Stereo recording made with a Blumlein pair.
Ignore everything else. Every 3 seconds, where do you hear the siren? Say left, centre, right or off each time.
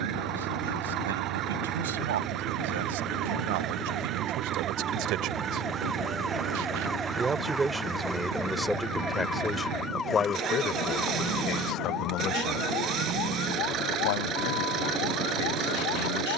right, right, centre, left, left, left.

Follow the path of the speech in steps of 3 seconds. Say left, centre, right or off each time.
right, right, centre, left, left, left.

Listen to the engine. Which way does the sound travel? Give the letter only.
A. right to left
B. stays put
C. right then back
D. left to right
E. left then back
B.